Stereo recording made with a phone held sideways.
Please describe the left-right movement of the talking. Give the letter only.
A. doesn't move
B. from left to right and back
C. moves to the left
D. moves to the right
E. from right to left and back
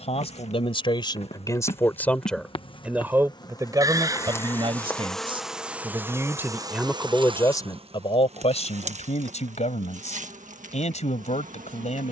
B.